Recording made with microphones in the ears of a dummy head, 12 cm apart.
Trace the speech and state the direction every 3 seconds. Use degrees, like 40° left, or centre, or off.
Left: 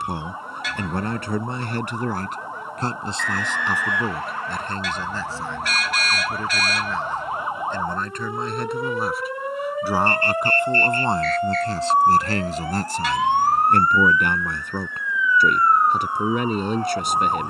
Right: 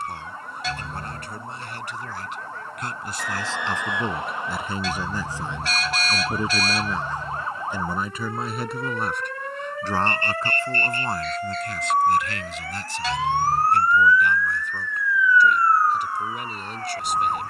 50° left, centre, 10° right, 20° left, 40° left, 50° left.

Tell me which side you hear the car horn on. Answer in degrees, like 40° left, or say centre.
30° right.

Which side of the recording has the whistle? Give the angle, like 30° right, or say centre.
20° right.